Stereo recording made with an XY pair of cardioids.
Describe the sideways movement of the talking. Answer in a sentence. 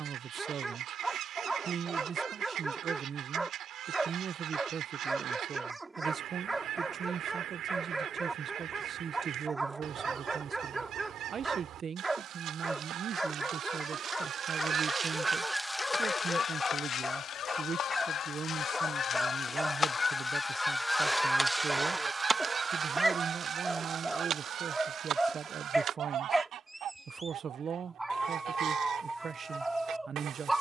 In this clip you hear the talking stay in one place.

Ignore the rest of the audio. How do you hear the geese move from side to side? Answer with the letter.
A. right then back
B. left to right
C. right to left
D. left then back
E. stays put
D.